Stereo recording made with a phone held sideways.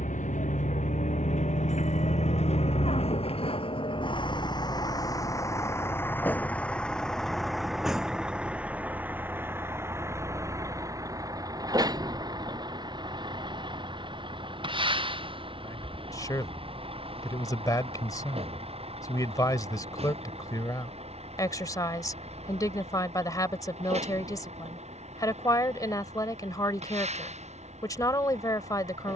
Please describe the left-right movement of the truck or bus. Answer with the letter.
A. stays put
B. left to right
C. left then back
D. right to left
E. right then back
B.